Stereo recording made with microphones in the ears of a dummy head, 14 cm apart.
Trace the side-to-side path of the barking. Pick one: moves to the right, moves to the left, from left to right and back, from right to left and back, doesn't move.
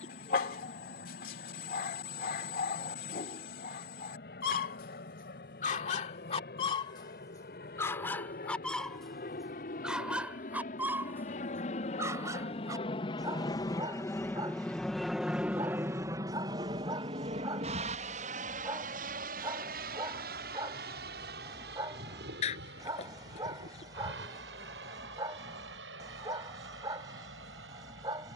moves to the right.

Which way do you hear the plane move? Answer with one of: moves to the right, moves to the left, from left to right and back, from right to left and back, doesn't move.
moves to the right.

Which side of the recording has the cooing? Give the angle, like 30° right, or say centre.
40° left.